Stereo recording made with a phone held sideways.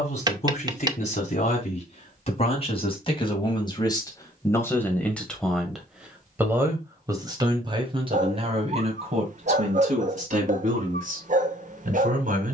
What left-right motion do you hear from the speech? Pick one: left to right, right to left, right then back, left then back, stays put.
left to right.